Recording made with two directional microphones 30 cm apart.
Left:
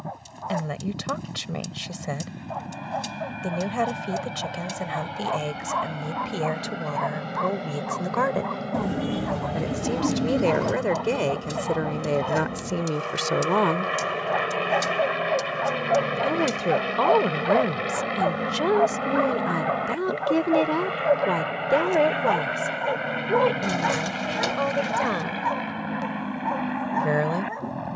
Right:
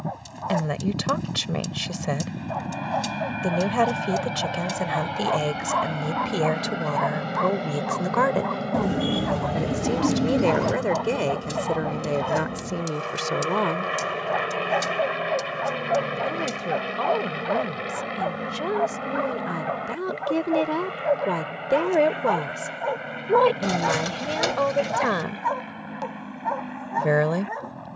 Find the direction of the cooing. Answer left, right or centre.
right.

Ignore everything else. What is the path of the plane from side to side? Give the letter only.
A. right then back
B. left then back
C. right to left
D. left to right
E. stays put
C.